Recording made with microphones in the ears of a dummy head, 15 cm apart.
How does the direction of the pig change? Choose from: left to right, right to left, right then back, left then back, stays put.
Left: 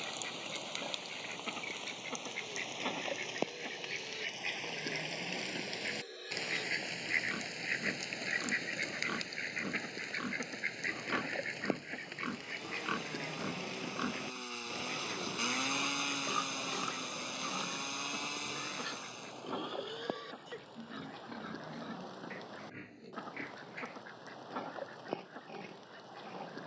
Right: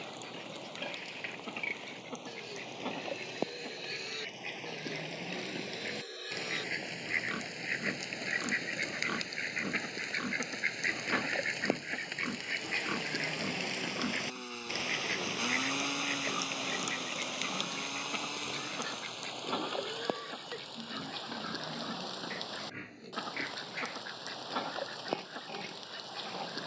left then back.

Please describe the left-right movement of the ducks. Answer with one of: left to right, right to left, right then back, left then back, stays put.
left to right.